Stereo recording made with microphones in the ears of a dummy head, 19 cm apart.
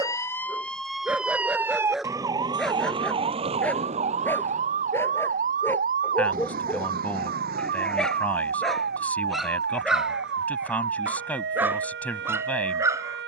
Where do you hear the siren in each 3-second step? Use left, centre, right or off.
centre, right, right, right, right.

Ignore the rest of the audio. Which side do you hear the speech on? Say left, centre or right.
centre.